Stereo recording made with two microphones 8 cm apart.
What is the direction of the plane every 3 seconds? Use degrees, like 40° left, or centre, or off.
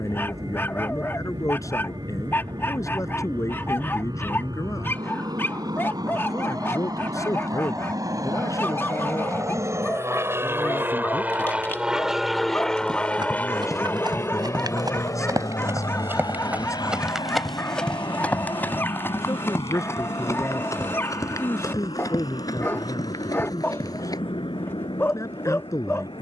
80° right, 70° right, 60° right, 30° right, 20° left, 50° left, 70° left, 70° left, 80° left.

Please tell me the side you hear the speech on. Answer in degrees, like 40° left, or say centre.
40° left.